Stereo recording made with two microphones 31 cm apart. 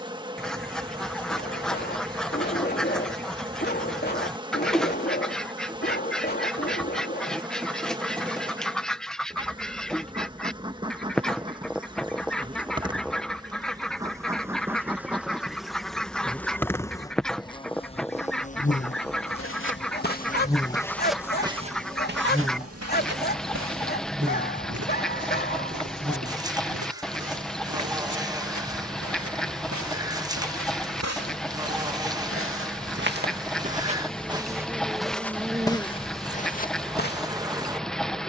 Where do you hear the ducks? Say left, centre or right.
centre.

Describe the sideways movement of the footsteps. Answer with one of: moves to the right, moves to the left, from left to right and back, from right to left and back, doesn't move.
from left to right and back.